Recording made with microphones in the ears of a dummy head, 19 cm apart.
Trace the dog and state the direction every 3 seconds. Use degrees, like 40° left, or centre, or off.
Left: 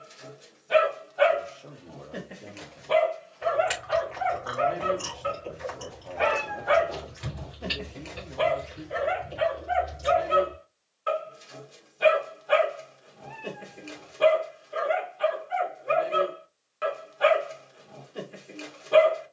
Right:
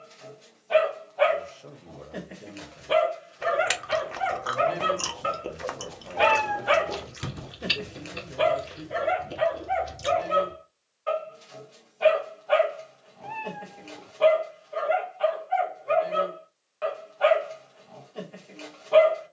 10° left, 40° right, 20° right, 10° left, 20° left, 20° left, 20° left.